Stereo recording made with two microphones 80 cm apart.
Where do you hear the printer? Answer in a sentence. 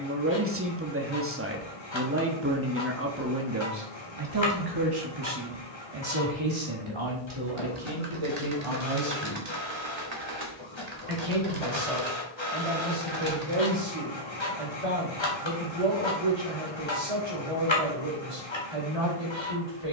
In this clip you hear the printer on the left.